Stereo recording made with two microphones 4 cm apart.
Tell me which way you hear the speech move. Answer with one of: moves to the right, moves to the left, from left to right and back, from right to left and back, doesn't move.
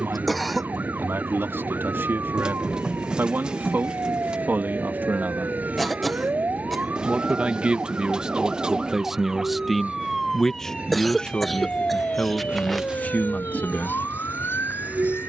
moves to the left.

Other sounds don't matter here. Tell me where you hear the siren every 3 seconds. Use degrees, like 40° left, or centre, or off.
60° right, 50° right, 30° right, 10° left, 50° left.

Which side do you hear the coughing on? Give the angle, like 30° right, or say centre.
centre.